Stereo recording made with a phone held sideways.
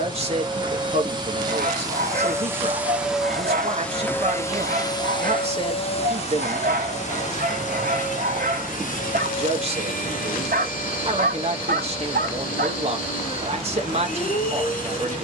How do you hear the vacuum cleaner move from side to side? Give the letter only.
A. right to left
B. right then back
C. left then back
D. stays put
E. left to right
A.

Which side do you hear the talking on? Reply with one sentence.
You can hear the talking on the right.